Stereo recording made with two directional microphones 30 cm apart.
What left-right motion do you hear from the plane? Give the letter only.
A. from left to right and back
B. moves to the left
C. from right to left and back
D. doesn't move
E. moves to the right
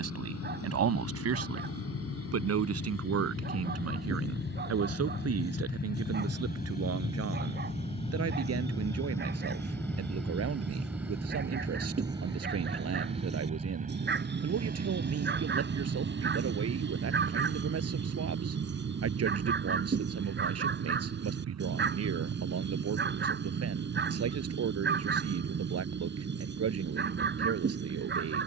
E.